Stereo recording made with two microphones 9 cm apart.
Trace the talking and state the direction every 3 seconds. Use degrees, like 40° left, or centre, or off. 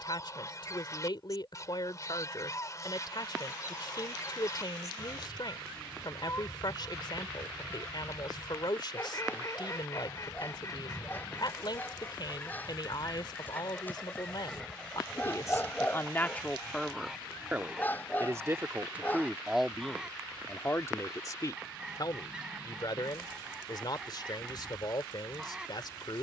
60° left, 60° left, 60° left, 60° left, 60° left, 20° left, centre, 50° left, 50° left.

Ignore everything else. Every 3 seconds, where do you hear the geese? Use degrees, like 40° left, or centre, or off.
40° left, 40° left, 40° left, 40° left, 10° left, centre, 10° right, 10° right, 10° right.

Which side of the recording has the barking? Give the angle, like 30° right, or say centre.
20° left.